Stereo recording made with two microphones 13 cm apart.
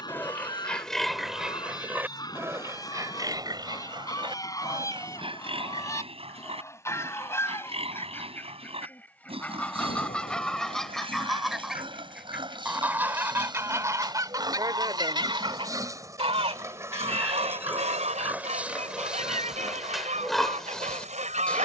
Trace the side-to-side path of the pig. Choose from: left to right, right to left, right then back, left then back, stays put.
right then back.